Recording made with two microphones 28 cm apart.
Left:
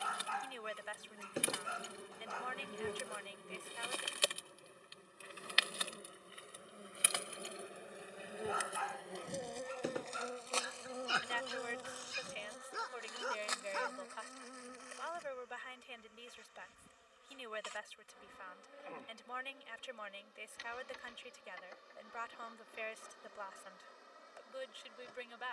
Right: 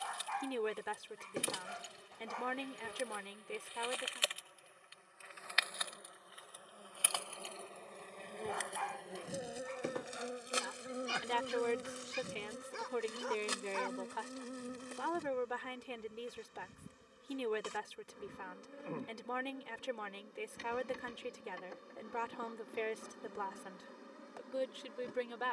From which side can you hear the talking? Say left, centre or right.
right.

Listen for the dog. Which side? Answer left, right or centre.
centre.